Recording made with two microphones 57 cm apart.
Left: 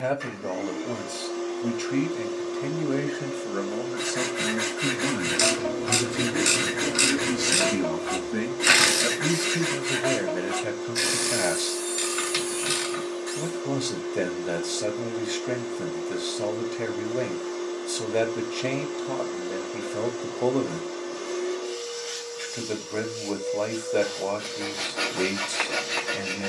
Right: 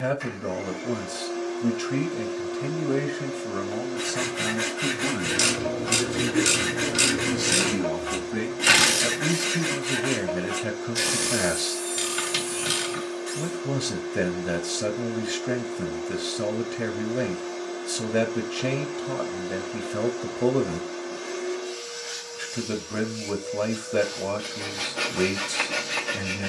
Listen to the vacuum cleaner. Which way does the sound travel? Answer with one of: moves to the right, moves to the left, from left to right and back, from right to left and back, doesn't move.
doesn't move.